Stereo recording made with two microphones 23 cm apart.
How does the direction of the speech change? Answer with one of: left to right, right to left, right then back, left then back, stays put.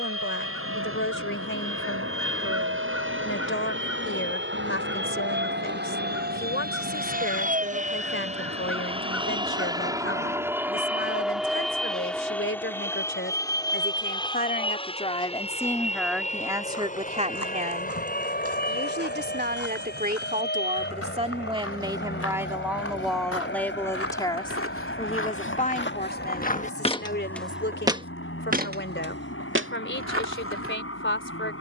right then back.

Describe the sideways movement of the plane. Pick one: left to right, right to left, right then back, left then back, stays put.
right to left.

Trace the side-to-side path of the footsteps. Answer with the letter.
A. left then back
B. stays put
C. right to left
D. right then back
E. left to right
E.